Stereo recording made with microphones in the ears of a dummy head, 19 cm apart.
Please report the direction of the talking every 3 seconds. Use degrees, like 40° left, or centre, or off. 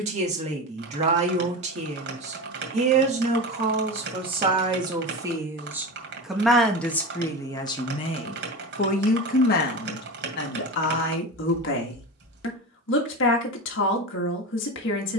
30° right, 20° right, 20° left, 50° left, 60° left.